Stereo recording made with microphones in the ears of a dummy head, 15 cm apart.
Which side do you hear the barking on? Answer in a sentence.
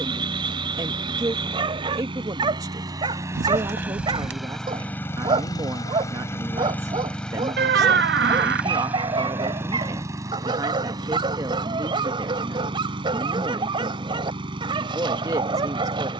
You can hear the barking on the right.